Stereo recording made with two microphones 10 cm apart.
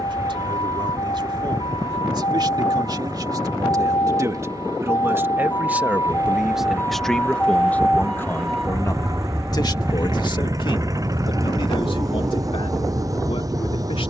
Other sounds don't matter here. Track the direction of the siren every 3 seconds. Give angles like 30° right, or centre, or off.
60° left, 40° left, 10° left, 20° right, 50° right.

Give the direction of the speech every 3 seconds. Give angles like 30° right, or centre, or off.
50° right, 30° right, 10° left, 50° left, 70° left.